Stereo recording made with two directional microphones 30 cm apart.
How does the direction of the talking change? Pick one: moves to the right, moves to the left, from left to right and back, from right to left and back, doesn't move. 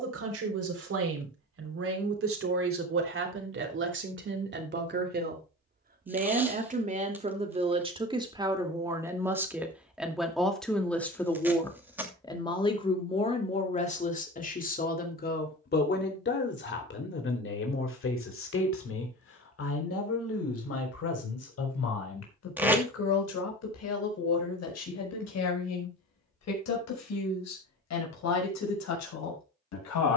moves to the left.